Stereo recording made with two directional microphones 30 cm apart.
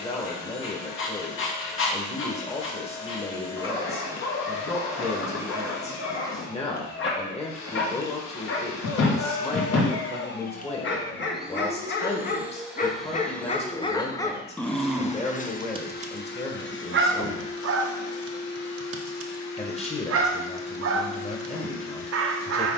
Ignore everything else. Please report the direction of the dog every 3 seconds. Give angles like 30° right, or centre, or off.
40° left, 40° left, 40° left, 40° left, 20° left, 30° right, 50° right, 50° right.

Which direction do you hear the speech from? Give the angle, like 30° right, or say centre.
20° left.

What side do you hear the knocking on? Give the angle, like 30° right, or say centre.
60° left.